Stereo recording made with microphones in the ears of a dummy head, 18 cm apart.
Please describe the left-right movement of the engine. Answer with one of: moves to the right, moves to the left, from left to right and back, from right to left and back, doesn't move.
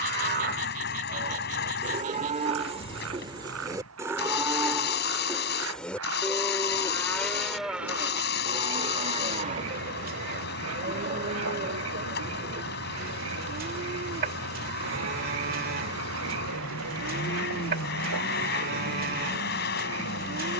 doesn't move.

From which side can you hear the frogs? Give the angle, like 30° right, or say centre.
80° right.